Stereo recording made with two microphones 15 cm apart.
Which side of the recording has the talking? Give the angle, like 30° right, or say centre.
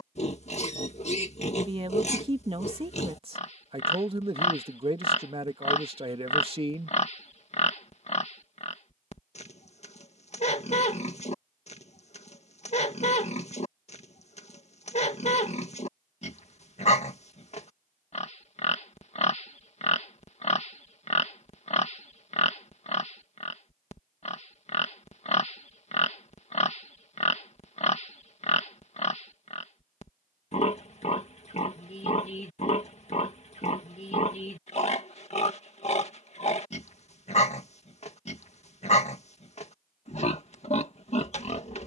40° right.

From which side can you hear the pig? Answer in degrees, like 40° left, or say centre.
50° left.